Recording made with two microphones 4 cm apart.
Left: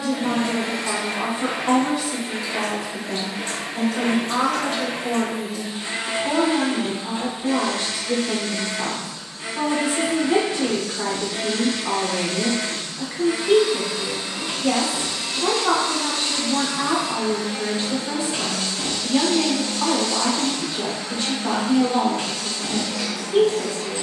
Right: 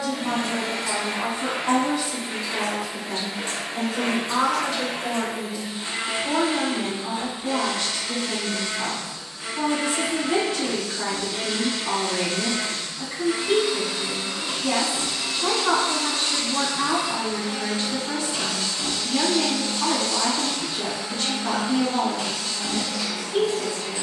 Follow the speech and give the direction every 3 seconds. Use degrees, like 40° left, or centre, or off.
10° left, 20° right, 10° left, 20° left, 20° left, 20° left, 20° left, 20° left.